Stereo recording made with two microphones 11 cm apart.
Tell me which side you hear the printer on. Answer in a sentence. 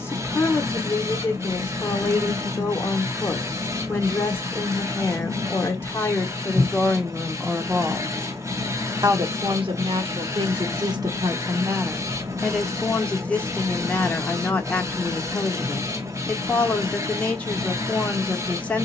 In this clip you hear the printer on the right.